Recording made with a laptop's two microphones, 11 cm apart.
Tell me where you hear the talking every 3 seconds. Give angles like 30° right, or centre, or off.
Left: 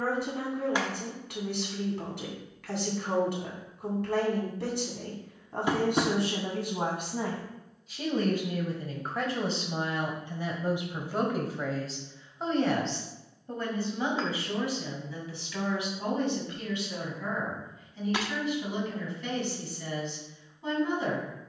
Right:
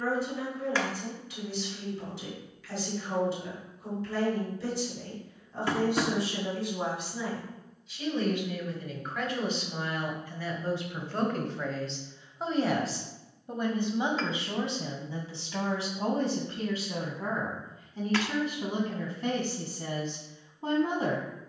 60° left, 60° left, 50° left, 20° left, 20° right, 40° right, 40° right.